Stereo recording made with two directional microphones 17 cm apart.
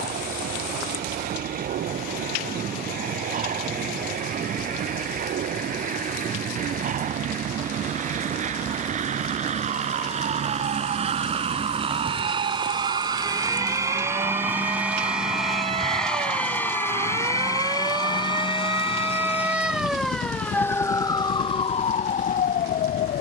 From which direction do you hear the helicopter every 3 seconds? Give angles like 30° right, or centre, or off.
70° right, 60° right, 50° right, 40° right, 20° right, 10° left, 40° left, 50° left.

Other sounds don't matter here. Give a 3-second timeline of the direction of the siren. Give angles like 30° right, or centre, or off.
60° right, 50° right, 50° right, 50° right, 40° right, 30° right, 10° right, 40° left.